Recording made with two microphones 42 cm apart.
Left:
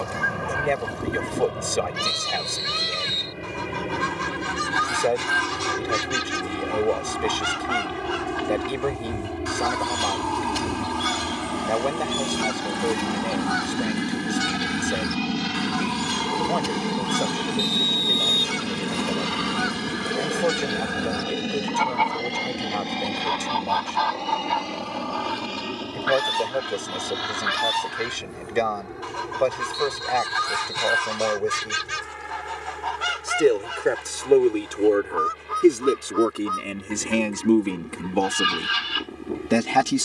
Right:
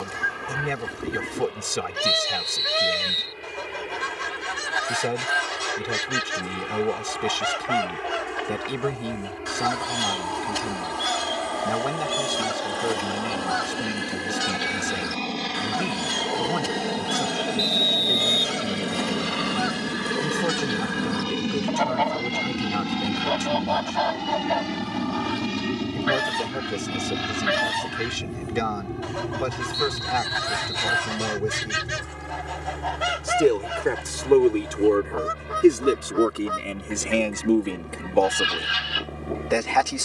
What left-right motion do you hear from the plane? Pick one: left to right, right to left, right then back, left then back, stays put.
left to right.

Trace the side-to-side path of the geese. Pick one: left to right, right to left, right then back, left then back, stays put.
stays put.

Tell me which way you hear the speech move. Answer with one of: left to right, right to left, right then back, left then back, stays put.
right to left.